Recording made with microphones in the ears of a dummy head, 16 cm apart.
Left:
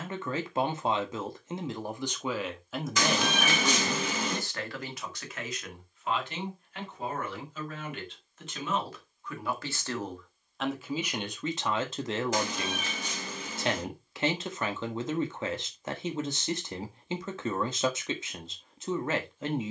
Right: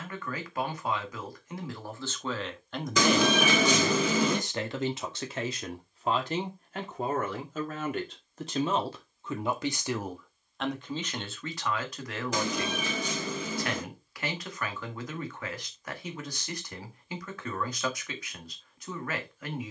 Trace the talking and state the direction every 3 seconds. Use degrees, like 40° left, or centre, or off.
20° left, 20° right, 40° right, centre, 20° left, 20° left, 20° left.